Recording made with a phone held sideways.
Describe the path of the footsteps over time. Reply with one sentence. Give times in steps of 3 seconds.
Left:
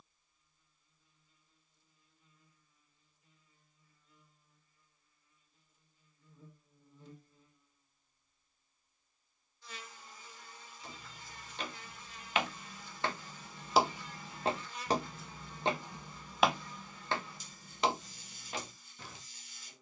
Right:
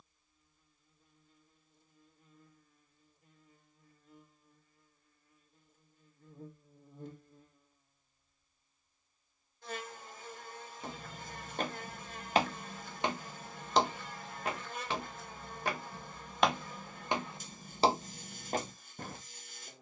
In this clip you hear the footsteps not at all from 0 s, on the right from 9 s, in the centre from 12 s and on the right from 18 s.